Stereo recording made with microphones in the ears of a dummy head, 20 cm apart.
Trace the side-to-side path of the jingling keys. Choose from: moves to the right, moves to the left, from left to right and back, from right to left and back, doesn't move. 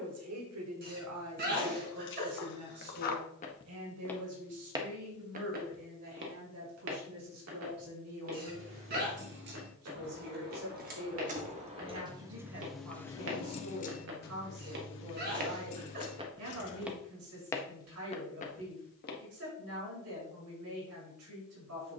moves to the left.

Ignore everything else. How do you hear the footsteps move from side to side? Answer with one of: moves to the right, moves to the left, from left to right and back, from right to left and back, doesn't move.
from left to right and back.